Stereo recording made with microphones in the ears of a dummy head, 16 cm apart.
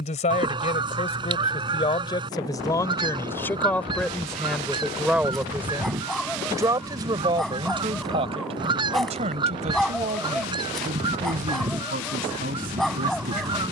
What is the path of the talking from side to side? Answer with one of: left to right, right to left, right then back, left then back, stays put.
left to right.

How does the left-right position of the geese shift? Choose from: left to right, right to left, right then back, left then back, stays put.
stays put.